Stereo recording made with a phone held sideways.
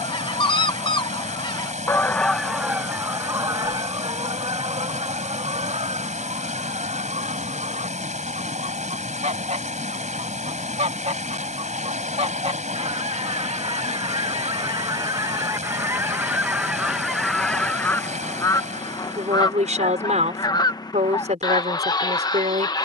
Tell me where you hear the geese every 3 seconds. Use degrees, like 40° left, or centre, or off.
20° left, 40° right, 50° right, 50° right, 40° right, 10° right, 30° left, 30° left.